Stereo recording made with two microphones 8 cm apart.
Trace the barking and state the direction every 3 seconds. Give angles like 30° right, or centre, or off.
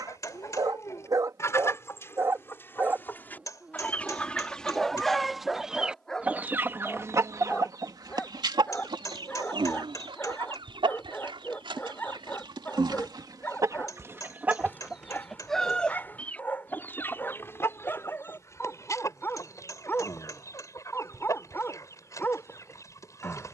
40° right, centre, 20° left, 20° left, 20° left, 20° left, 20° left, 20° left.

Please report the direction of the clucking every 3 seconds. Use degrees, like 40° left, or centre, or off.
30° left, 10° left, 40° right, 80° right, 40° right, 20° left, 40° left, 40° left.